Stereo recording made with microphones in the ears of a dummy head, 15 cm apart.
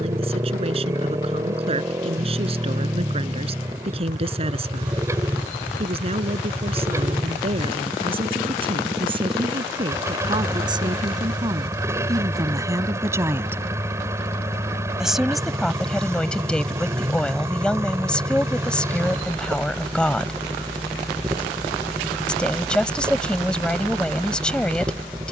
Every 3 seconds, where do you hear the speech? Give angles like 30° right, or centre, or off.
40° right, 40° right, 40° right, 30° right, 20° right, centre, 10° left, 10° left, 10° left.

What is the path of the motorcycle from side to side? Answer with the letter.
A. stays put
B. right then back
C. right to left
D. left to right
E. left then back
A.